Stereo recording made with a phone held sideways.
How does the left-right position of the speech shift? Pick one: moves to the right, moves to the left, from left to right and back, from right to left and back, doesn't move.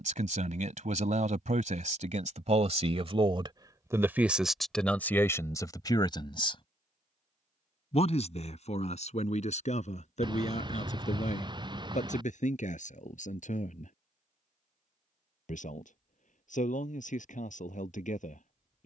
moves to the left.